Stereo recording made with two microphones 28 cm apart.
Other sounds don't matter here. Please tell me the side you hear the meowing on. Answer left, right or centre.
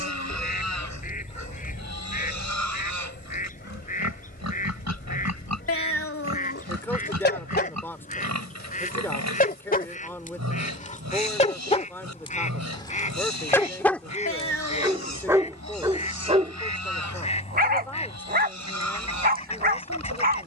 left.